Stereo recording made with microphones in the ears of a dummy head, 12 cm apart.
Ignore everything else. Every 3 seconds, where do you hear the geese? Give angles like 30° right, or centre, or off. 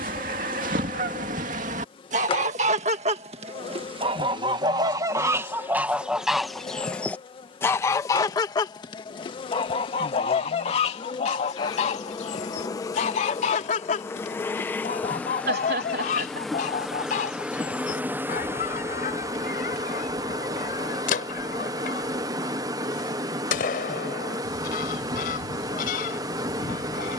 60° right, 30° right, 20° left, 50° left, 60° left, 60° left, 70° left, 70° left, 70° left.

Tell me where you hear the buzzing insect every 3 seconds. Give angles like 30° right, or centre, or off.
40° left, 40° left, 40° left, 40° left, 20° left, centre, 20° right, 30° right, 30° right.